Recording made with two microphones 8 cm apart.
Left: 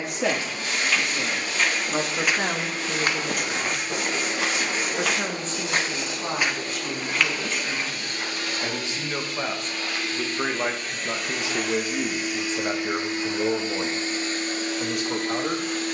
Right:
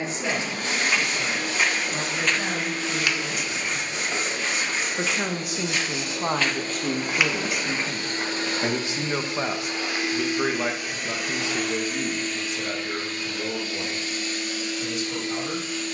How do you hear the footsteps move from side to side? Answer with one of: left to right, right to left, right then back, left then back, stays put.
left then back.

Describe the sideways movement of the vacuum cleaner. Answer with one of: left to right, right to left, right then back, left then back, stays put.
right to left.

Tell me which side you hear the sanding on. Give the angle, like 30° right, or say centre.
30° right.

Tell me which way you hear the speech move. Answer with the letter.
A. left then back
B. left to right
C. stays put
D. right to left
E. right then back
E.